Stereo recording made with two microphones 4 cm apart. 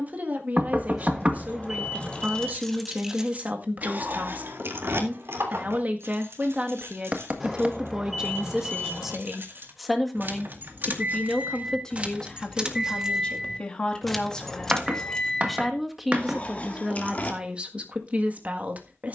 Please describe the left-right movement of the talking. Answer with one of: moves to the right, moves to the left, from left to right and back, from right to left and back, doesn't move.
from right to left and back.